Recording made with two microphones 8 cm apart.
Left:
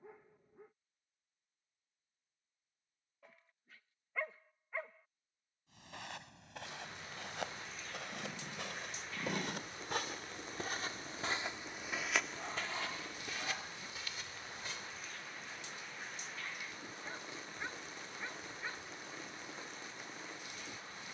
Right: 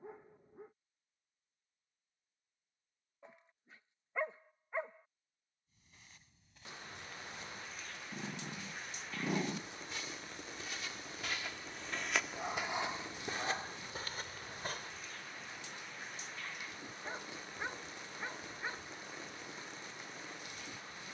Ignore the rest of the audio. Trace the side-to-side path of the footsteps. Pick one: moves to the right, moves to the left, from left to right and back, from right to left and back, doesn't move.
moves to the right.